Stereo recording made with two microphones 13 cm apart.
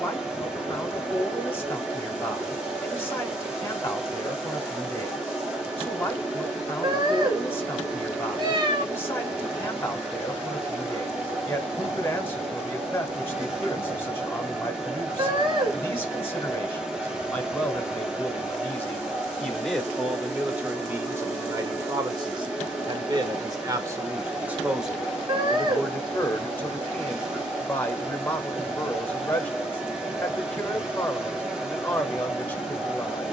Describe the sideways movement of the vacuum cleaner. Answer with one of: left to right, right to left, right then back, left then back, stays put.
stays put.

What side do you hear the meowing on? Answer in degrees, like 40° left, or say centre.
40° right.